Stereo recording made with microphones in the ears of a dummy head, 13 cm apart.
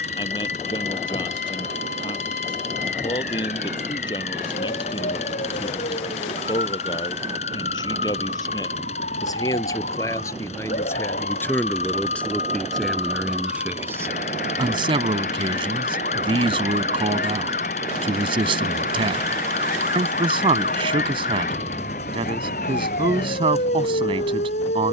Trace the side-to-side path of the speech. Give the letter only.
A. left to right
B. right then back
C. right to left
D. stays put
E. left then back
A.